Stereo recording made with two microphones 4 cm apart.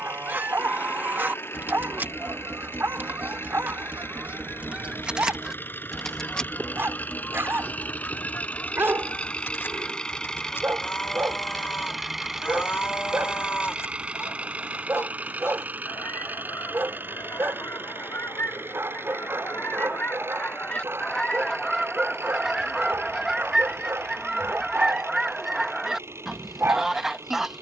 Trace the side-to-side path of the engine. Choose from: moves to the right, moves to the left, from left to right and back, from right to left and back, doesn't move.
moves to the right.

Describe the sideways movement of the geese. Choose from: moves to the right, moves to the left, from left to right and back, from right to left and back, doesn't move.
from right to left and back.